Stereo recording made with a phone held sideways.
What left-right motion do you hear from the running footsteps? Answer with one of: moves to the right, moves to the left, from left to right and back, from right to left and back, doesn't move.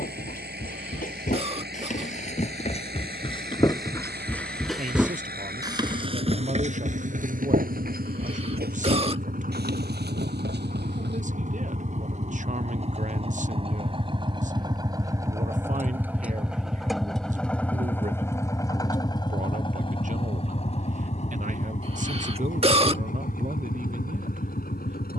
moves to the right.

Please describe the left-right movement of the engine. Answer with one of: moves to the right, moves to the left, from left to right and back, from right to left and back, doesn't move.
moves to the left.